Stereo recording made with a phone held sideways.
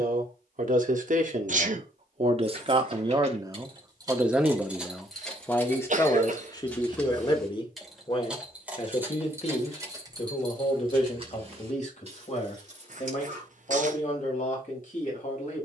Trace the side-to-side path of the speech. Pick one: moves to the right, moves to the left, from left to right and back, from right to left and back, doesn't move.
moves to the left.